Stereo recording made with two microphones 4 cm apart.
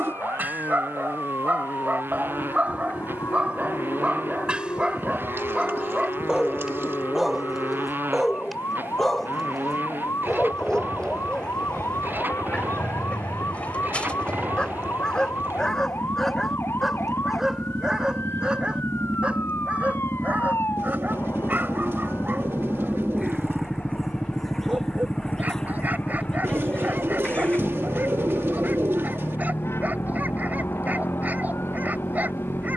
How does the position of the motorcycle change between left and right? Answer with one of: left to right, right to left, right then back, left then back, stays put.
right to left.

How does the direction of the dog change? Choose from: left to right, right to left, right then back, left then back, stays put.
left then back.